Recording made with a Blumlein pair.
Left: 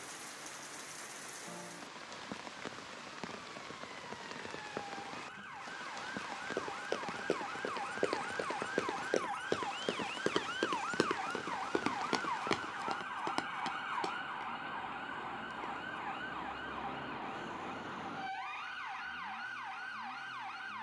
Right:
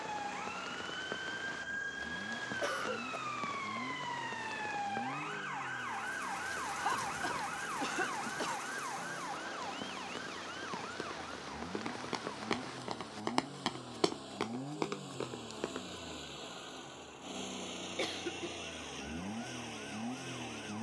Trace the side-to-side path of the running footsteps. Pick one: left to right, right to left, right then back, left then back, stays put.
left to right.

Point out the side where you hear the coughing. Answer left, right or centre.
right.